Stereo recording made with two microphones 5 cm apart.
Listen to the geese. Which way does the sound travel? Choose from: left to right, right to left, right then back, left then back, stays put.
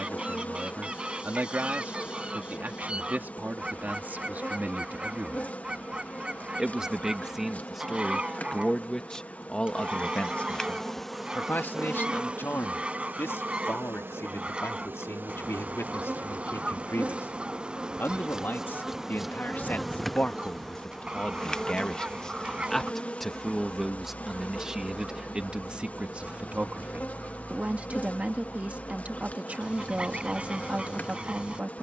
stays put.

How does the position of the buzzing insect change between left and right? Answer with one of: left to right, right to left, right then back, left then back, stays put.
right then back.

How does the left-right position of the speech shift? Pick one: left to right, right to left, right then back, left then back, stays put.
left then back.